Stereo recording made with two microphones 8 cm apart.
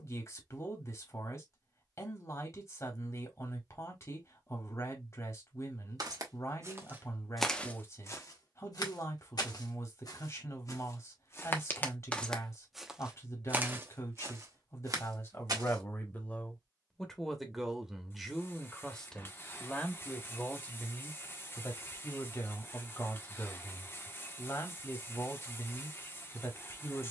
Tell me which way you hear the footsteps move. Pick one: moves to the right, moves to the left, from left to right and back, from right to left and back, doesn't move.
from right to left and back.